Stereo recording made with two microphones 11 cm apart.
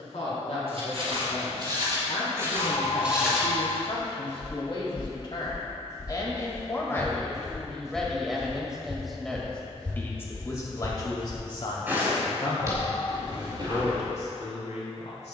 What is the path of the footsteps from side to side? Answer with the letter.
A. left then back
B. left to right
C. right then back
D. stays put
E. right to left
A.